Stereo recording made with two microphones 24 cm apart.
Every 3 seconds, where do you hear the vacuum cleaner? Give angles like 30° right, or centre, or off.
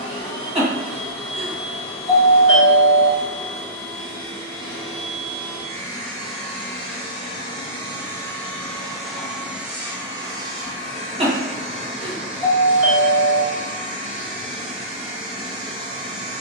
30° left, 30° left, 20° left, 10° right, 20° right, 20° right.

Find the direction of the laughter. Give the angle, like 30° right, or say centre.
20° right.